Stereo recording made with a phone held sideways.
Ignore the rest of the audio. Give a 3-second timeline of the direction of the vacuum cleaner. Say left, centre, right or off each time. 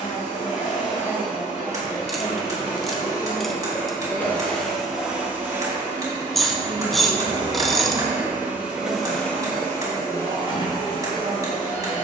left, centre, right, left.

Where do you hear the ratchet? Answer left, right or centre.
centre.